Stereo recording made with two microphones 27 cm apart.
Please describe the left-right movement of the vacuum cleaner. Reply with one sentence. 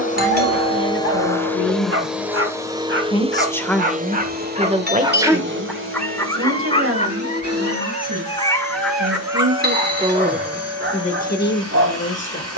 In this clip you hear the vacuum cleaner travel towards the right.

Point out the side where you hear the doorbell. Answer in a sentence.
You can hear the doorbell on the right.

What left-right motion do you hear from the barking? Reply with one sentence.
You can hear the barking go left and come back.